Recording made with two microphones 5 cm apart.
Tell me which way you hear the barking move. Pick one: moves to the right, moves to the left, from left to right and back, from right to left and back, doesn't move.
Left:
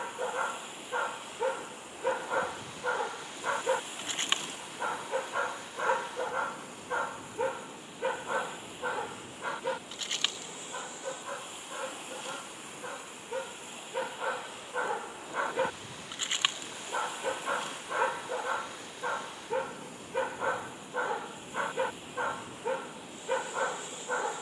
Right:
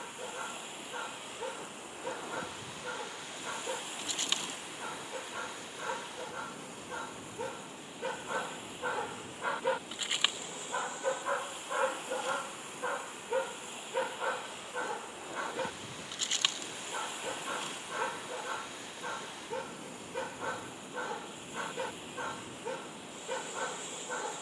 from left to right and back.